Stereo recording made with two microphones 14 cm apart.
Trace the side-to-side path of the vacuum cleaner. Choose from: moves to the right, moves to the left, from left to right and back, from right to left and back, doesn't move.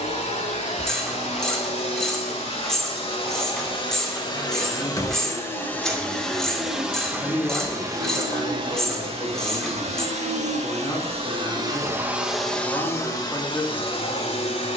from left to right and back.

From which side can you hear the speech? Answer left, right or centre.
left.